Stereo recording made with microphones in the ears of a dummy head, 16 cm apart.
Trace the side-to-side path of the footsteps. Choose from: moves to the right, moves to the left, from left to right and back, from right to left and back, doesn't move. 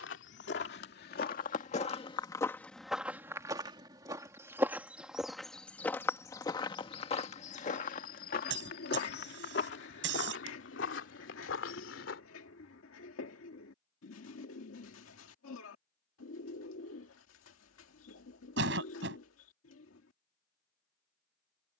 from left to right and back.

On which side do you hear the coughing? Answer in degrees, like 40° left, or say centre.
70° right.